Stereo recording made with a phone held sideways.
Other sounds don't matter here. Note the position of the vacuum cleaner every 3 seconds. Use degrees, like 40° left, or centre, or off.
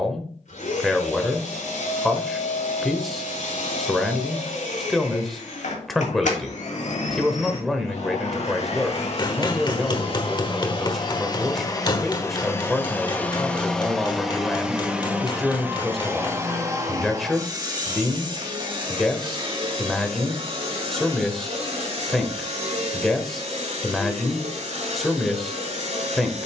80° left, 70° left, 60° left, 40° left, 10° left, 20° right, 40° right, 50° right, 60° right.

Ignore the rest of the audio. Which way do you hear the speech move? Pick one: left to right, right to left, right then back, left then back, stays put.
stays put.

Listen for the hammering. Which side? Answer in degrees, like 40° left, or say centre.
30° left.